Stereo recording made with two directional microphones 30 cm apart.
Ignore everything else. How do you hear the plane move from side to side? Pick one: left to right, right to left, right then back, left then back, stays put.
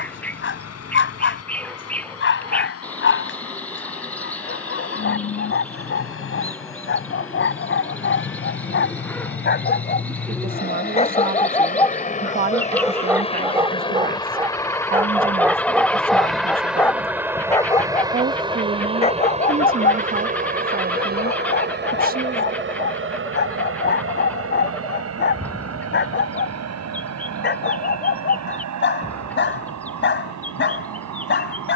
left to right.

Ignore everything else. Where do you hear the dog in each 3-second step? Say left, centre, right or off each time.
left, left, left, left, centre, centre, left, left, left, left, left.